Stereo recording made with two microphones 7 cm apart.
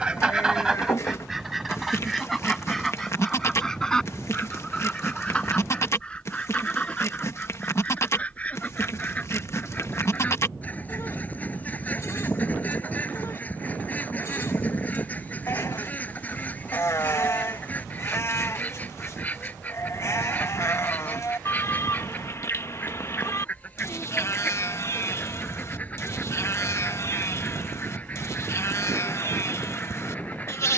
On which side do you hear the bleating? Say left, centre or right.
left.